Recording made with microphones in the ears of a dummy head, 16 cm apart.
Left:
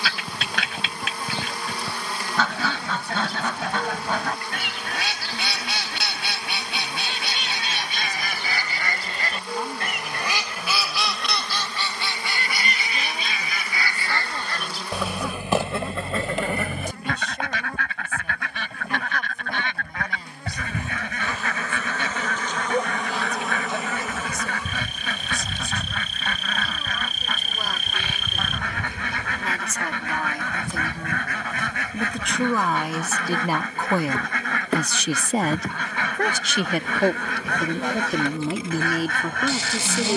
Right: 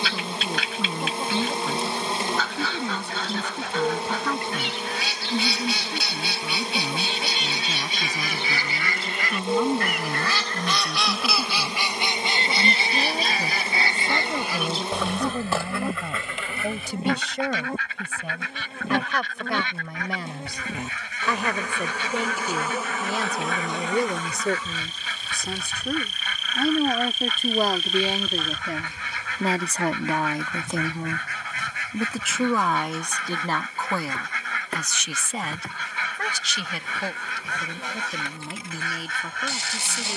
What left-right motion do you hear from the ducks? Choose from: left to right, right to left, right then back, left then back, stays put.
right then back.